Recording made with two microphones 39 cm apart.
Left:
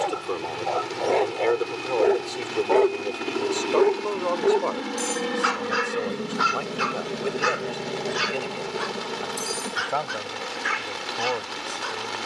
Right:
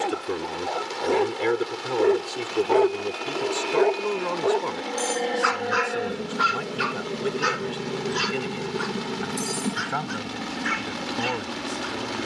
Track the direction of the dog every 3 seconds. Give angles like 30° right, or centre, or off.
20° right, 40° left, 60° left, 80° left.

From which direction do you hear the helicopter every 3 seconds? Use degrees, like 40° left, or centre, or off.
40° left, 30° left, 10° right, 50° right.